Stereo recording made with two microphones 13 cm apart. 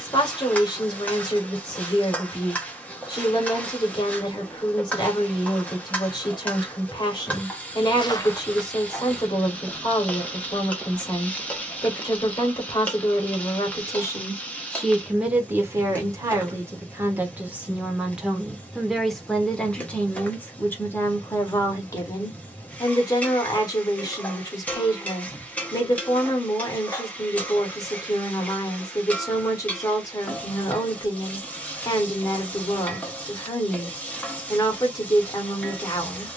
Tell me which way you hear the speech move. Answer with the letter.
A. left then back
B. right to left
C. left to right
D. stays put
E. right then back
E.